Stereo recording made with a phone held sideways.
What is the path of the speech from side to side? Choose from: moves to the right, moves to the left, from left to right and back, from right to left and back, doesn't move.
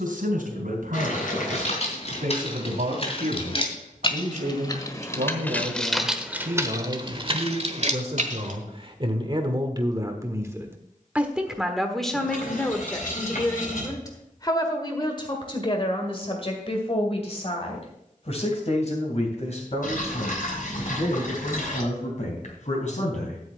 moves to the left.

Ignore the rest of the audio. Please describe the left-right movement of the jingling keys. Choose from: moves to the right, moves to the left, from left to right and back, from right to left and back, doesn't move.
moves to the right.